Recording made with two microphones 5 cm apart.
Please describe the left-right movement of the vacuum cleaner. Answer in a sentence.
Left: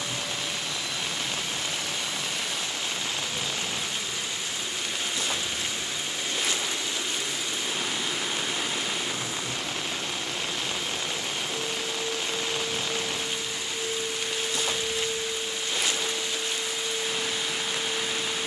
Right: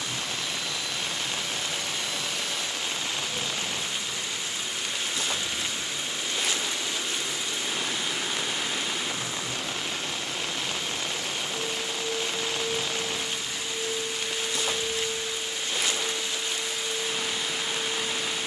In this clip you hear the vacuum cleaner stay in one place.